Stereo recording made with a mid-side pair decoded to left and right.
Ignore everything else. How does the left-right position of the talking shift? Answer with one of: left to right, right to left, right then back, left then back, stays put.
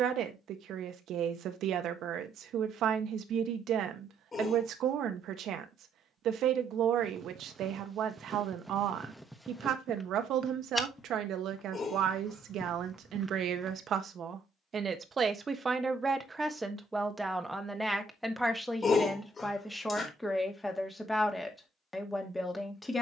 right to left.